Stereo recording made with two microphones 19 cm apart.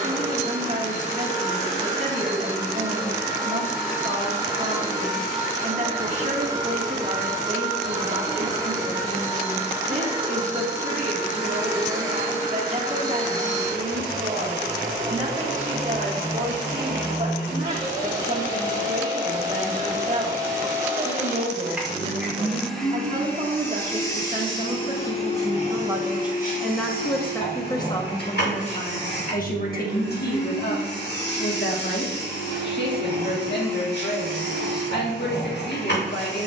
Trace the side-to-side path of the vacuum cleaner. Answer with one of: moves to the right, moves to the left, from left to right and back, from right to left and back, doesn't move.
moves to the left.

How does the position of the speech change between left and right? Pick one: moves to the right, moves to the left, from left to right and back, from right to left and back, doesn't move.
moves to the left.